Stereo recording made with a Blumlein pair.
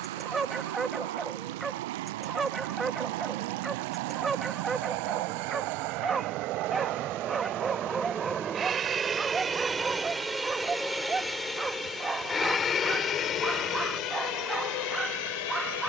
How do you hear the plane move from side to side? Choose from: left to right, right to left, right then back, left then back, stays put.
right to left.